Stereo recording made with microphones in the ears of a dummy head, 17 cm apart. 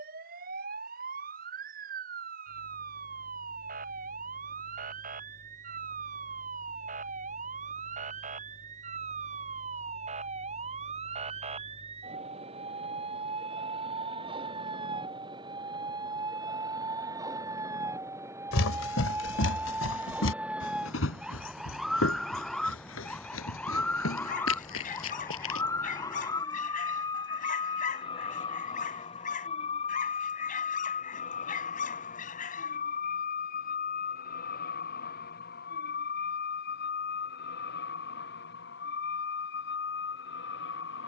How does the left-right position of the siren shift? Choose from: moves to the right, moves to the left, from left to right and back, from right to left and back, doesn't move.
moves to the left.